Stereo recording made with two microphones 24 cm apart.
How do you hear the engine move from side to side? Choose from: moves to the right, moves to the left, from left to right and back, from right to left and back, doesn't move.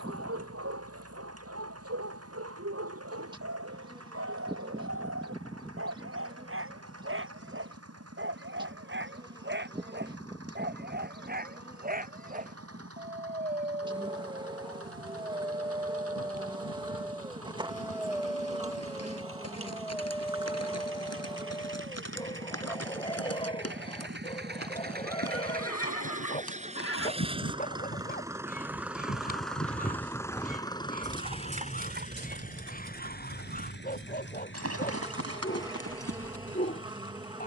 moves to the left.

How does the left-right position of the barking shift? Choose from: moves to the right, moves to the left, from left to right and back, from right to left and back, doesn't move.
moves to the left.